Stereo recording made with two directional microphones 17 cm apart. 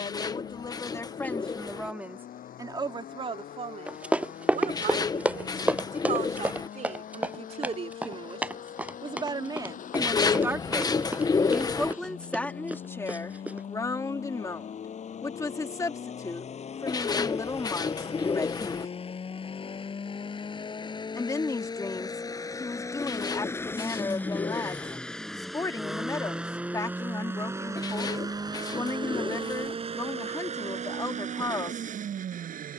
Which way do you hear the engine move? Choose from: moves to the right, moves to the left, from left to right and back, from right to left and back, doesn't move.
moves to the right.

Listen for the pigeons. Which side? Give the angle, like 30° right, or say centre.
20° left.